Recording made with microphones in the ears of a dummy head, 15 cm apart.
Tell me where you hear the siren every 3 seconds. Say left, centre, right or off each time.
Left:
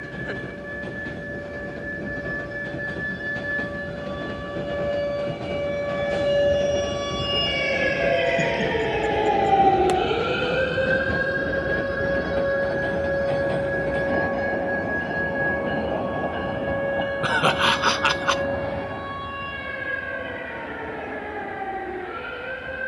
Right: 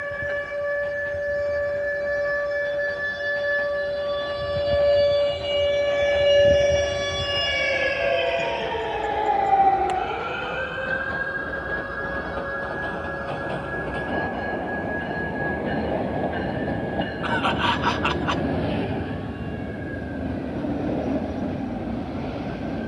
right, right, centre, left, left, left, left, left.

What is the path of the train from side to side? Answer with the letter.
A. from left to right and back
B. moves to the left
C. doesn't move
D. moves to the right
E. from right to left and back
D.